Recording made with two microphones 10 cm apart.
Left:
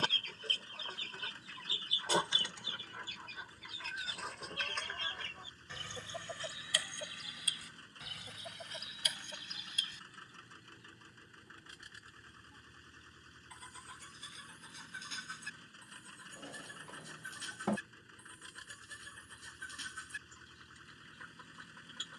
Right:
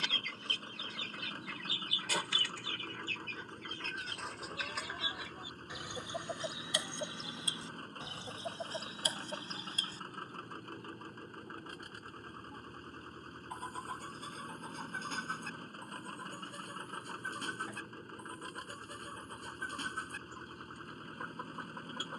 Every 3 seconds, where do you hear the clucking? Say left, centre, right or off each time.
left, centre, right, right, right, right, right, right.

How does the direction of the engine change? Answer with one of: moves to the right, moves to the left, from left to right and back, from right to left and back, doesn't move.
doesn't move.